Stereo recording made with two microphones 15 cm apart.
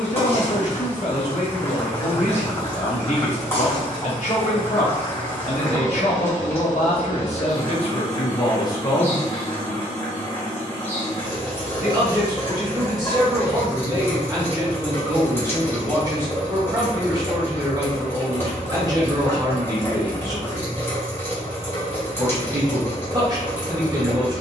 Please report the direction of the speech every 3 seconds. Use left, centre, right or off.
left, left, left, centre, right, right, right, right.